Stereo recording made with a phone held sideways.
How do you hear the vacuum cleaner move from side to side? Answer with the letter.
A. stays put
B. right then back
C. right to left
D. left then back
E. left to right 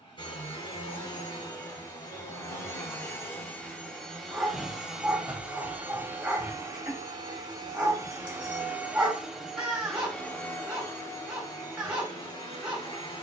B.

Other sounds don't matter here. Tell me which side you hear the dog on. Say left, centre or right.
centre.